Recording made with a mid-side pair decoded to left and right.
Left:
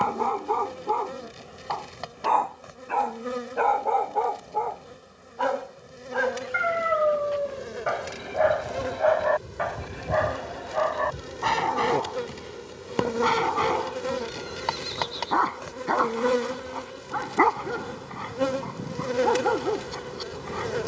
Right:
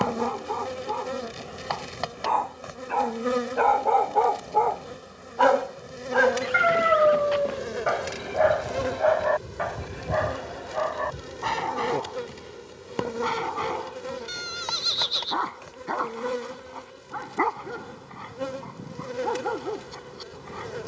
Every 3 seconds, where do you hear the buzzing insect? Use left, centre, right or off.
right, right, right, centre, left, left, left.